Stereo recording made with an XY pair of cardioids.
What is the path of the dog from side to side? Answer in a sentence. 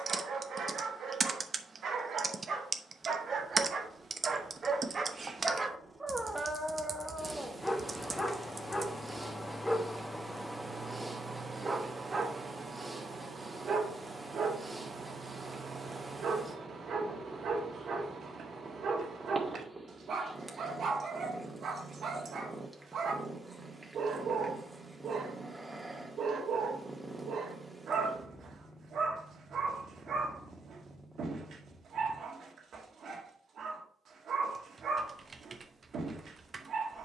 You can hear the dog go left and come back.